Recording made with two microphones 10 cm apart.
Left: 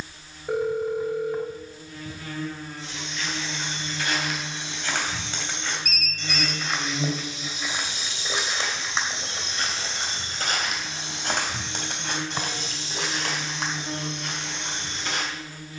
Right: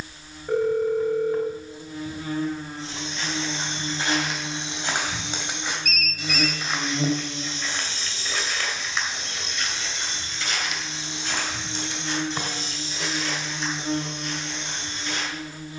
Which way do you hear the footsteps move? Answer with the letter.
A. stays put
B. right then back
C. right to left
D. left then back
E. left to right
C.